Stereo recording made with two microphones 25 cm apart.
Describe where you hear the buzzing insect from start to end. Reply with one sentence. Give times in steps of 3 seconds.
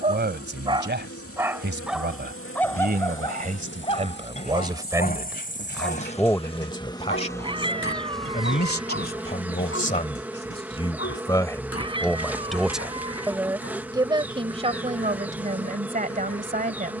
You can hear the buzzing insect on the left from 0 s and in the centre from 6 s.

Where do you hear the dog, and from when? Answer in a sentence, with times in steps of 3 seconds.
In this clip you hear the dog in the centre from 0 s and on the left from 3 s.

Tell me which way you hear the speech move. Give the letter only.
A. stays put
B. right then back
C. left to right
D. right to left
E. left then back
E.